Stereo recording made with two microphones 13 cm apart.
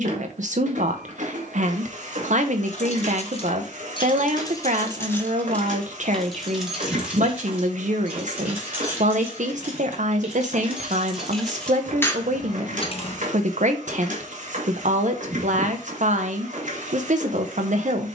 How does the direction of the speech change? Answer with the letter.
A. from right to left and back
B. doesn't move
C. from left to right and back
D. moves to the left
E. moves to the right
B.